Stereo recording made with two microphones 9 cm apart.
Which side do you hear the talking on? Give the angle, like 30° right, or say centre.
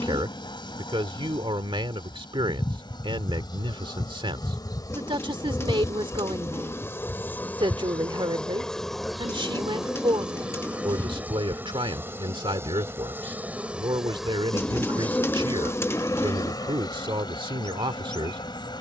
70° right.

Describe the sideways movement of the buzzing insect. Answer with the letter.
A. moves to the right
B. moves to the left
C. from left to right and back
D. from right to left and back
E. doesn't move
C.